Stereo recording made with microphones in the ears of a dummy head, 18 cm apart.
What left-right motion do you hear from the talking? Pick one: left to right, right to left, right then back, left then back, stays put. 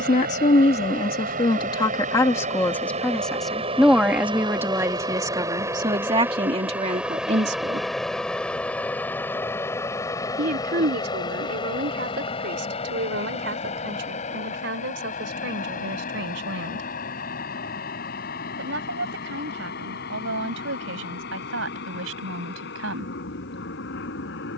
left to right.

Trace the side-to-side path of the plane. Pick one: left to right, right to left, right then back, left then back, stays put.
right to left.